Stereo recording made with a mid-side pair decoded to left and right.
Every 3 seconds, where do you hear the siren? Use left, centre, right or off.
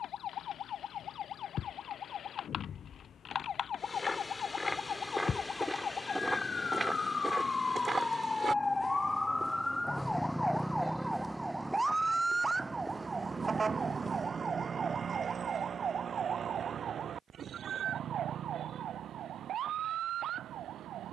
left, left, left, centre, right, right, right.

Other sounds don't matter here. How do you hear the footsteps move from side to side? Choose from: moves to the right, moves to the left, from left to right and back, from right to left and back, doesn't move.
from left to right and back.